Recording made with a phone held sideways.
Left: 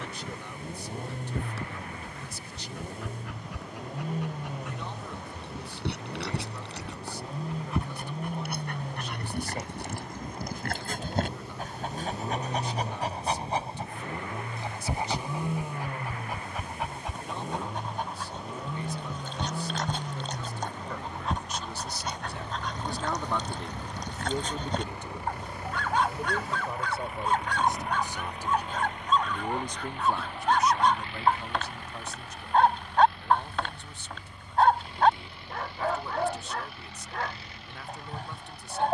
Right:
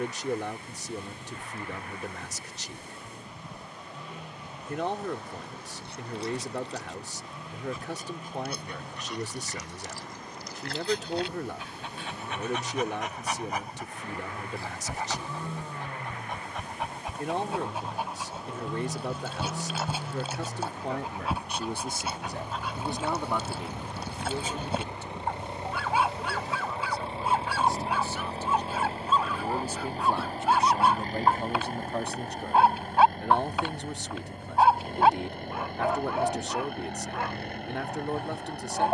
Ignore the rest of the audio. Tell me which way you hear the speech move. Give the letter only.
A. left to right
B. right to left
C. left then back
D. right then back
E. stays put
C.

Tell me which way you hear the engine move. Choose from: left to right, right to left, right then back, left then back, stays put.
left to right.